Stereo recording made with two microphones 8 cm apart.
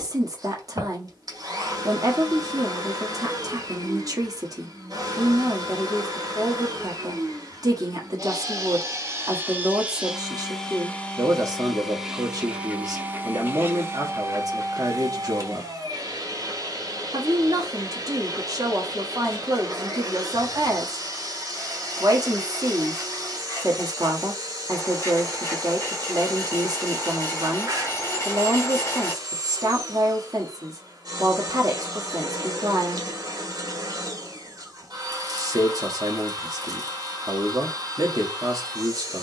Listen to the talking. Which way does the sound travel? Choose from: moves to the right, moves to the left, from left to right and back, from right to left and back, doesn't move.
doesn't move.